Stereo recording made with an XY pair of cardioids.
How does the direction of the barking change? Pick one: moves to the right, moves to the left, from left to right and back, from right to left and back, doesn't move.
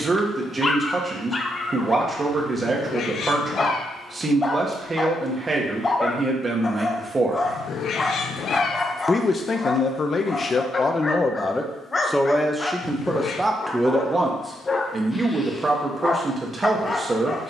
doesn't move.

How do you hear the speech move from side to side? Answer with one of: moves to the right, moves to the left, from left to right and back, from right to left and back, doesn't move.
from right to left and back.